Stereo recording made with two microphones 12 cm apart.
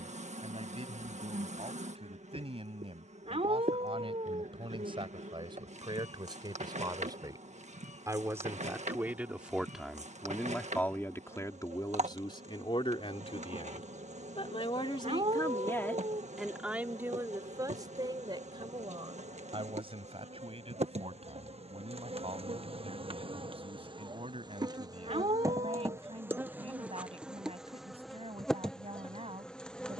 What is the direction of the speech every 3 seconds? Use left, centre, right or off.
right, right, right, centre, left, centre, right, right, right, right.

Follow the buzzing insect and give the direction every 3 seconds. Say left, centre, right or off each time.
right, right, right, right, right, right, right, right, right, centre.